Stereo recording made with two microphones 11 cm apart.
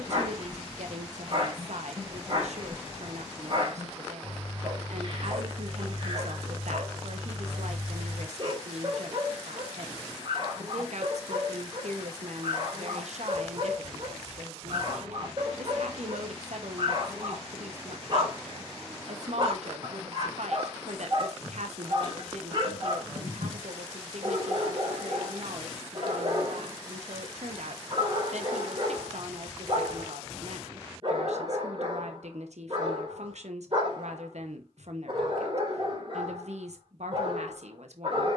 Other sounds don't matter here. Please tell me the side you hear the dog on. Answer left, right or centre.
right.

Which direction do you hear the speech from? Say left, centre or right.
right.